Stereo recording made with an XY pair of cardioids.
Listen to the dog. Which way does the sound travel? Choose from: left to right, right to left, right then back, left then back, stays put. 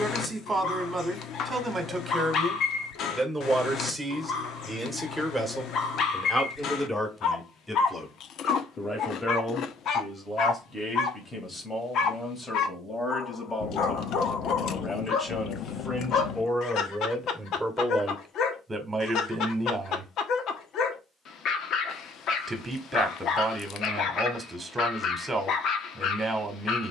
stays put.